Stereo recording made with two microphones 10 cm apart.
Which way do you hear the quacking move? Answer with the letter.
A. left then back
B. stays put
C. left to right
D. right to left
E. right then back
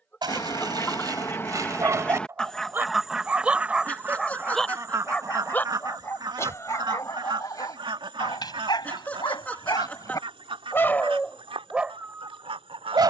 C.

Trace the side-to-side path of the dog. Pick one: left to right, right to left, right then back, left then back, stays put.
left then back.